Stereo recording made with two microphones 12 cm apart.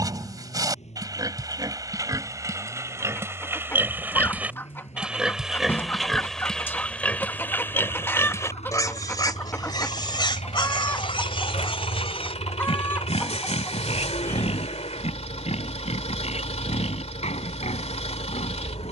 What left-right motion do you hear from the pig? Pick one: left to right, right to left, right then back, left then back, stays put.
right to left.